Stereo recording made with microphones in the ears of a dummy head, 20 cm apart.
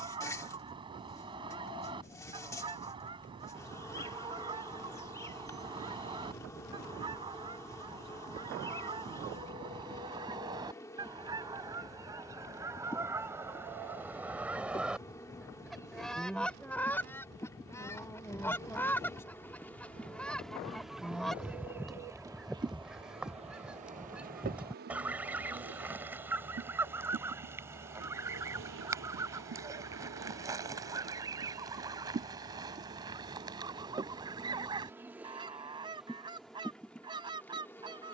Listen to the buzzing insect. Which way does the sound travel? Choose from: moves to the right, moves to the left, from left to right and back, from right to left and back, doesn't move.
from left to right and back.